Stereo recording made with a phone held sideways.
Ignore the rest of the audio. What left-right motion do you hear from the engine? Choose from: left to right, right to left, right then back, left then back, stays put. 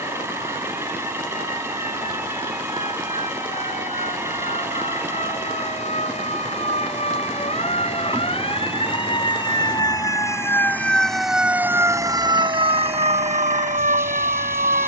stays put.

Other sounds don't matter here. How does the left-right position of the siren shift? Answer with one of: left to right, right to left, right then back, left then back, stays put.
left to right.